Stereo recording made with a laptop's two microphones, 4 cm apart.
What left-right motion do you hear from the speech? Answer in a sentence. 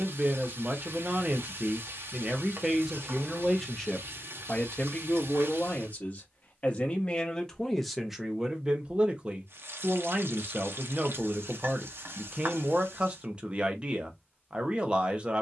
You can hear the speech move from right to left and back again.